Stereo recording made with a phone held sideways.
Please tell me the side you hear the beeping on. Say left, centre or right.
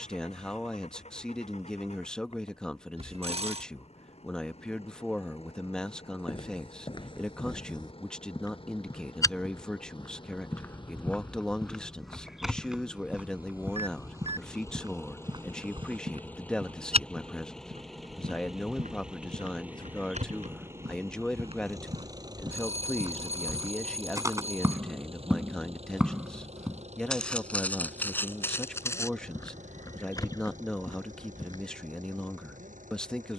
right.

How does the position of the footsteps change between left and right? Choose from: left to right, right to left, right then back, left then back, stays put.
right then back.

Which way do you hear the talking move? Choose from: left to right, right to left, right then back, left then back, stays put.
stays put.